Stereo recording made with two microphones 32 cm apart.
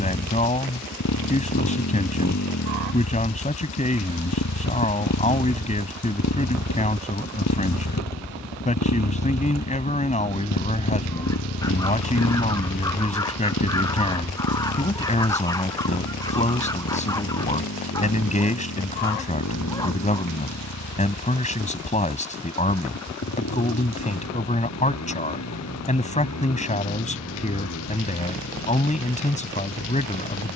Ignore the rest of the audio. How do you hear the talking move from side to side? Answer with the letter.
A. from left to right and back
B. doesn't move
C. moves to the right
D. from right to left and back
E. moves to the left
B.